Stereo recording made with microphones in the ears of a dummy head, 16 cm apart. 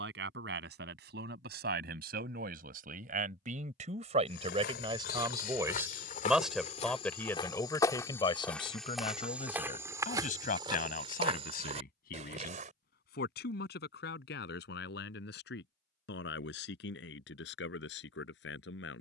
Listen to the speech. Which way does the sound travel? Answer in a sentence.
You can hear the speech move from right to left.